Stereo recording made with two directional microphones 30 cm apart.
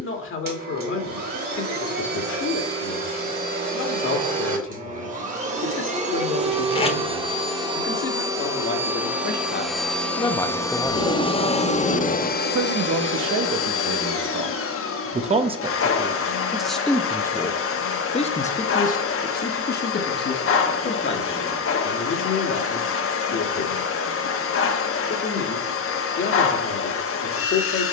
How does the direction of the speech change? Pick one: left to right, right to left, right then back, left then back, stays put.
right then back.